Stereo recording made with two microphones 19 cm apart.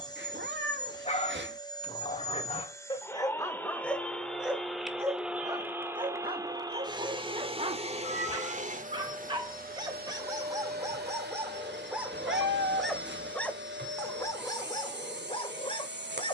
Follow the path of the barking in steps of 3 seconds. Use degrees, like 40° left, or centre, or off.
30° left, centre, 30° right, 20° right, 10° left, 30° left.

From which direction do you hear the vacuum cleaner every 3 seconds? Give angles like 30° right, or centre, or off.
20° left, centre, 30° right, 50° right, 60° right, 60° right.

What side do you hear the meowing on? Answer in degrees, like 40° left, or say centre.
70° right.